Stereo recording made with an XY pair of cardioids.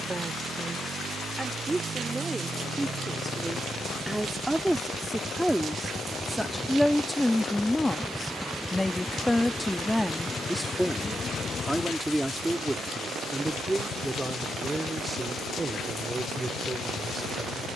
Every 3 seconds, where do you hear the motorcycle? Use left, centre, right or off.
right, right, centre, left, left, left.